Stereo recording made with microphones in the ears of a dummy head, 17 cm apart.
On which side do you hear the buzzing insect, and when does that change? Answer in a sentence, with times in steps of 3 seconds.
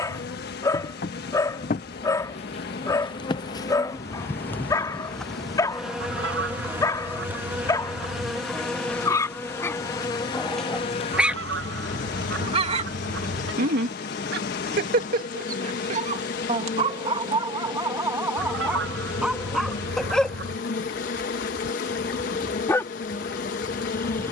You can hear the buzzing insect on the left from 0 s, in the centre from 3 s and on the left from 9 s.